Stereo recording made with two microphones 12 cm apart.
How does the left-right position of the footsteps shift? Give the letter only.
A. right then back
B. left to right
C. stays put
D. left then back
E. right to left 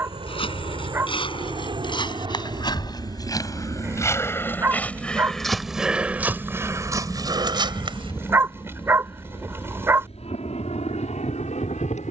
B.